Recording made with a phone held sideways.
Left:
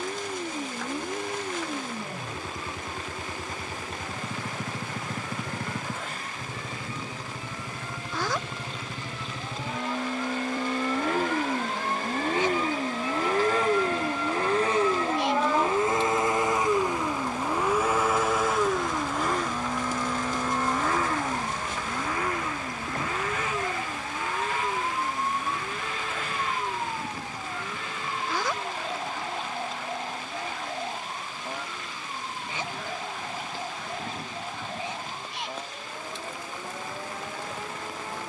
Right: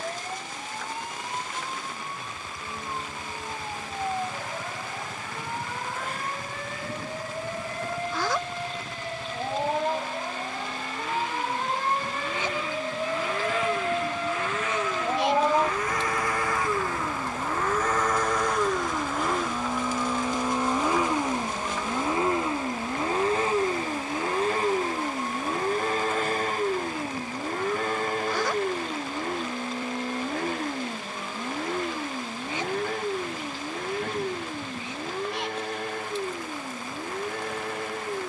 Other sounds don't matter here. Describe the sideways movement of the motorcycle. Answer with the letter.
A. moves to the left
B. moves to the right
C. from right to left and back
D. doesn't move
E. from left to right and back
B.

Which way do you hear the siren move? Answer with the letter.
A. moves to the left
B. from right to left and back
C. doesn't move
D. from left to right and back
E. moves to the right
A.